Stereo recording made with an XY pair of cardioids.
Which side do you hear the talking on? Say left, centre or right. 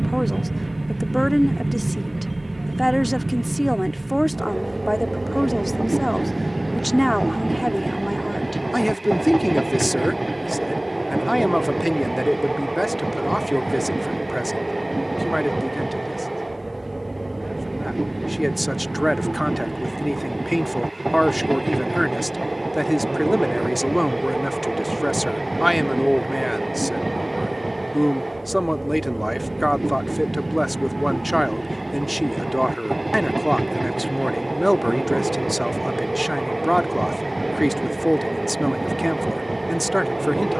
centre.